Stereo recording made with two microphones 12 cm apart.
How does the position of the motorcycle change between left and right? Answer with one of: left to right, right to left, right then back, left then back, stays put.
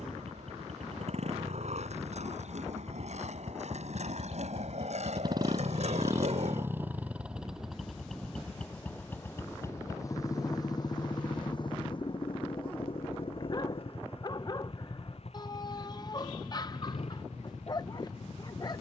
right to left.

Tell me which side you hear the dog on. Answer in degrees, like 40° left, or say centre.
40° left.